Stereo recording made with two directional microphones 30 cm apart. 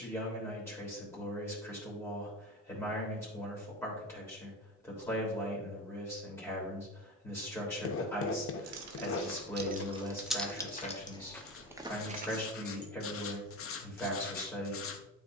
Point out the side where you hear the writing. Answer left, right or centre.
left.